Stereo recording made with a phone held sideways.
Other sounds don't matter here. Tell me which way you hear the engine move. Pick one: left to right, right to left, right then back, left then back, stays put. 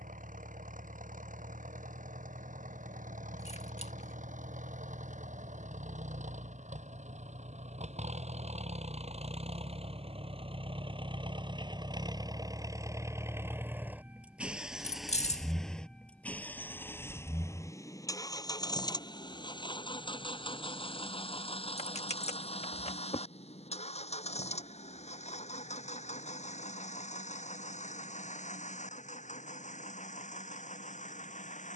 right to left.